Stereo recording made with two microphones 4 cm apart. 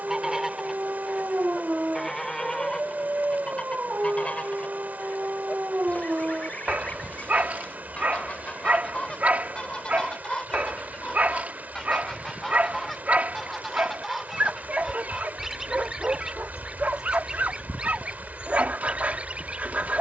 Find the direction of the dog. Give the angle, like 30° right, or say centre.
40° right.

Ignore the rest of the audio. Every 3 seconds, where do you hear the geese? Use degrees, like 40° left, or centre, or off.
centre, 30° left, 30° left, 20° left, centre, 20° right, 30° right.